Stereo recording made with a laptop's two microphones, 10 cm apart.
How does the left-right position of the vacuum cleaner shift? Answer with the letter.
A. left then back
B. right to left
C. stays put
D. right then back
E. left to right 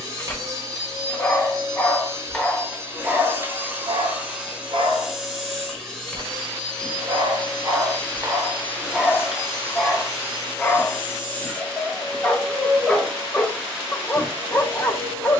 A.